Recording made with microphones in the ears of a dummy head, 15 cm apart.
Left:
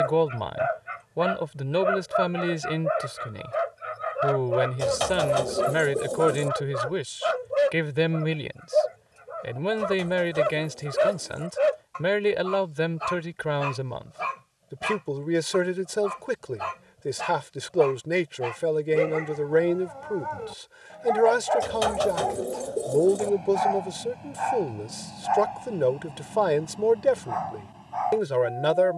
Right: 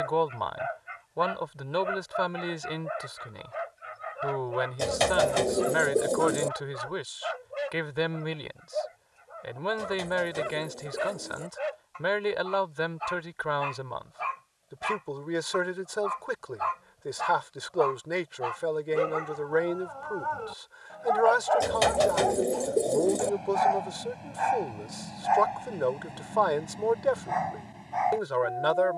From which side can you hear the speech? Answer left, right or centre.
left.